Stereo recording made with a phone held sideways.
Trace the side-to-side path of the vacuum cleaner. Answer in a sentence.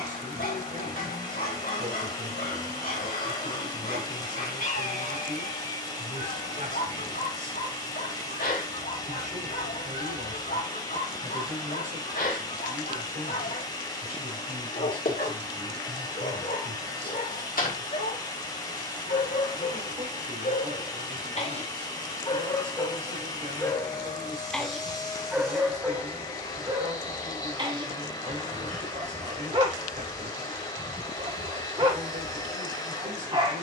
You can hear the vacuum cleaner stay in one place.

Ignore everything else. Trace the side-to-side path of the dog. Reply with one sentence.
In this clip you hear the dog move from left to right.